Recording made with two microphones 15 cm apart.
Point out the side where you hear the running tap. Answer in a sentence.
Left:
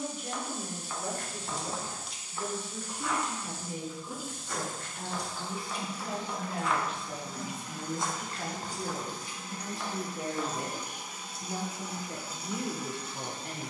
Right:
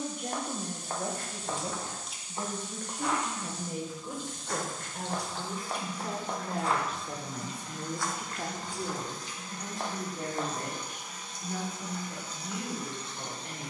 You can hear the running tap in the centre.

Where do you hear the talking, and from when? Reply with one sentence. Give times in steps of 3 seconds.
You can hear the talking on the right from 0 s, in the centre from 9 s and on the left from 12 s.